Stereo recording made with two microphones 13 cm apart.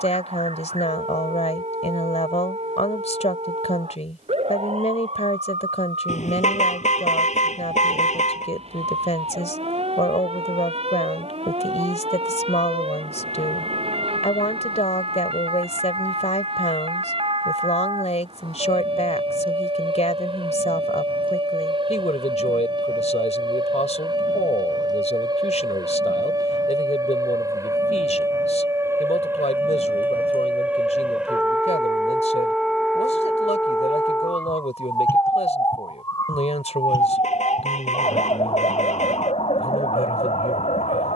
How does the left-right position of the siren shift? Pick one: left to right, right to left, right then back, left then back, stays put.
right to left.